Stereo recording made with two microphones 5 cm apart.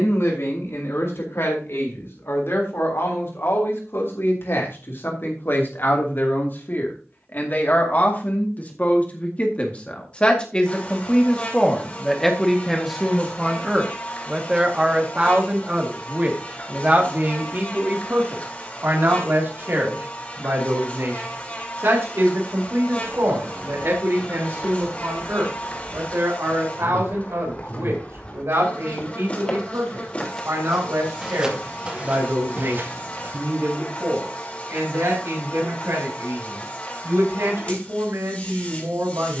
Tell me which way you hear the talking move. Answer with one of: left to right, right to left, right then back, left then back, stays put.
left to right.